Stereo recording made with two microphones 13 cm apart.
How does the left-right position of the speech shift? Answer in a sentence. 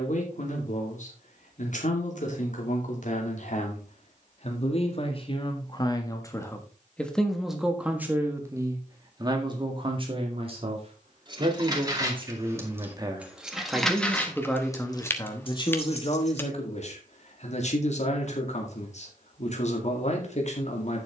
You can hear the speech go right and come back.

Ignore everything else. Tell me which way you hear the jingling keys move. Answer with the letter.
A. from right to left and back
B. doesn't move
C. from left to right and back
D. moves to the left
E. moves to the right
D.